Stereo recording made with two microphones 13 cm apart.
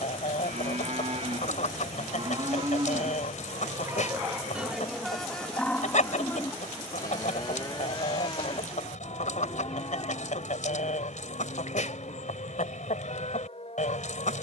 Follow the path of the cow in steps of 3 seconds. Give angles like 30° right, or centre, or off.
50° right, 10° right, 30° left, 50° left, 60° left.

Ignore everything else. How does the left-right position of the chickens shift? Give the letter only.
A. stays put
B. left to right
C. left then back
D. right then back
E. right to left
A.